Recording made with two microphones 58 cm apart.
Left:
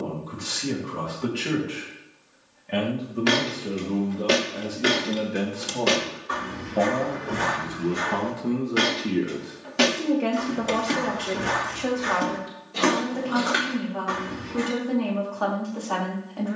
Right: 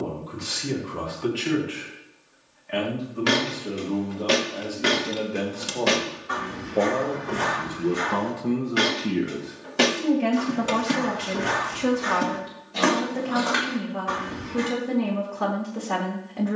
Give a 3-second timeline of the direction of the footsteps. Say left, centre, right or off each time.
off, right, centre, centre, right, off.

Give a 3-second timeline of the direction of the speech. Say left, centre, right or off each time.
left, left, centre, right, right, right.